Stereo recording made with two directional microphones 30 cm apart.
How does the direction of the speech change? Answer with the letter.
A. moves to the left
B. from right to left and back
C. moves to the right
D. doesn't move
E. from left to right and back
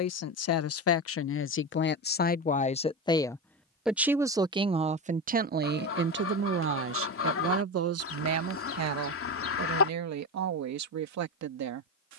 C.